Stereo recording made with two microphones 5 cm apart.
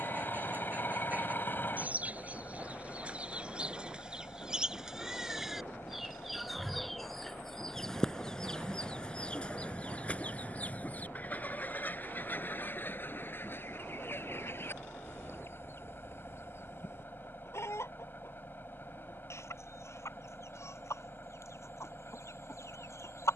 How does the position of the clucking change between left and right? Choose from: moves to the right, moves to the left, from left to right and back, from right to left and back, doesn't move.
moves to the left.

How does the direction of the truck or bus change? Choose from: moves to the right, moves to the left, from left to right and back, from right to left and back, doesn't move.
doesn't move.